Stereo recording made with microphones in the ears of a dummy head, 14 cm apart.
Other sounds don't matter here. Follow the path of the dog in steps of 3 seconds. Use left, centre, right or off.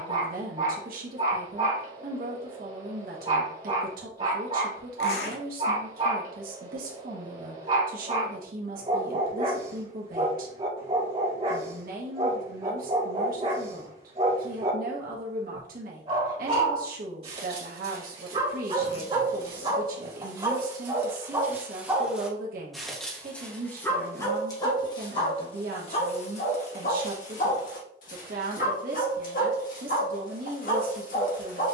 right, right, right, right, right, right, right, centre, left, left, left.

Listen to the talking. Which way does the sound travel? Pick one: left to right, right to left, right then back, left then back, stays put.
stays put.